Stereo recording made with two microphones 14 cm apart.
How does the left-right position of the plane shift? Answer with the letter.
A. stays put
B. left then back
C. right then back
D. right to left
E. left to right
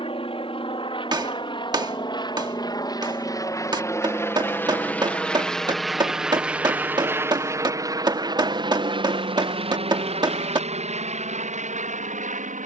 E.